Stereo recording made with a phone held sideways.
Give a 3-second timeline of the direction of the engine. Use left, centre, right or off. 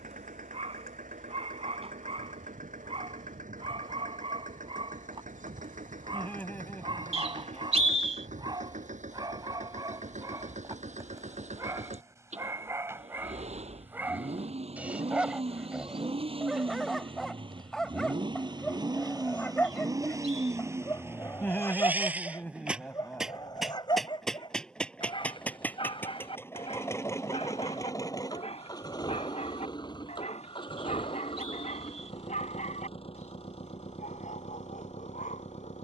right, right, right, right, right, right, right, centre, centre, left, left, left.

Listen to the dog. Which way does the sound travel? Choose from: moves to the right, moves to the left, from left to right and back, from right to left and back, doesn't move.
moves to the left.